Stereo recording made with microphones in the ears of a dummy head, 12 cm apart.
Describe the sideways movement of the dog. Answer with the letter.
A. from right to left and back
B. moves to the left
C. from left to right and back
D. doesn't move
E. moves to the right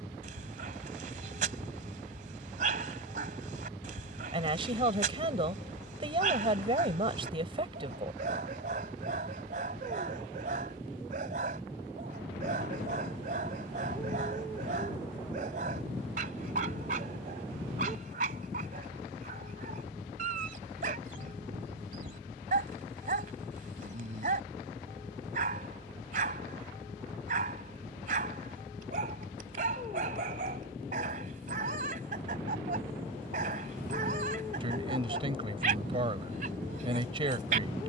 D.